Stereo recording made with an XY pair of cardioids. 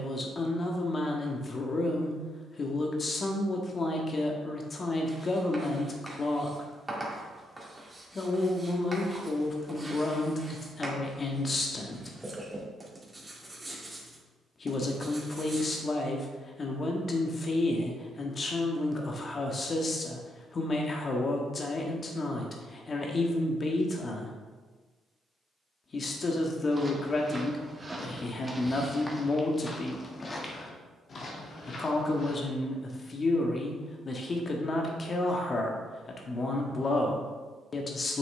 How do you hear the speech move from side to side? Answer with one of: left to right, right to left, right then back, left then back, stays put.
stays put.